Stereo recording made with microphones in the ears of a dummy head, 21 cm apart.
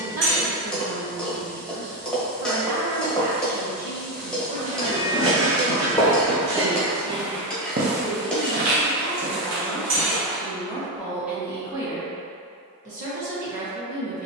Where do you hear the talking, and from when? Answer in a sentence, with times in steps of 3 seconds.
You can hear the talking on the right from 0 s, in the centre from 6 s and on the right from 12 s.